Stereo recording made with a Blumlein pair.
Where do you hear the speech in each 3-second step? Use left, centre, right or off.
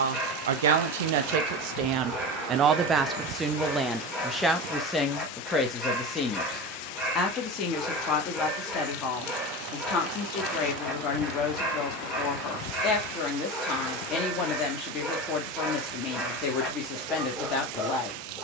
right, centre, left, left, left, left.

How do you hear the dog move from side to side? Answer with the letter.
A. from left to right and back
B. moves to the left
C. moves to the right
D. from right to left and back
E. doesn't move
E.